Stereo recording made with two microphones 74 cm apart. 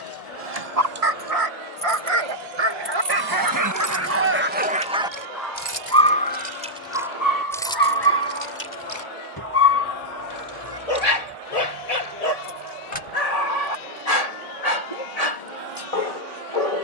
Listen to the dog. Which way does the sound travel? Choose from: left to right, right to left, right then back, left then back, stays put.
right to left.